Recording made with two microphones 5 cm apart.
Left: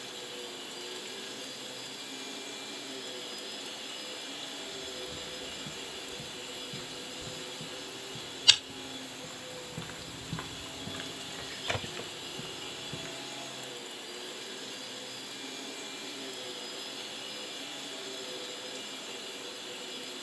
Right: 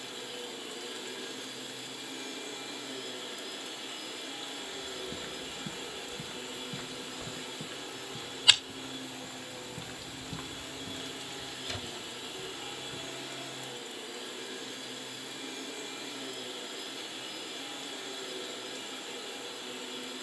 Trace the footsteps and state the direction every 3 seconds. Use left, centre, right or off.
off, right, right, left, left, off, off.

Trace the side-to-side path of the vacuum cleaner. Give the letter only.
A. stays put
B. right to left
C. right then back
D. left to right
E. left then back
A.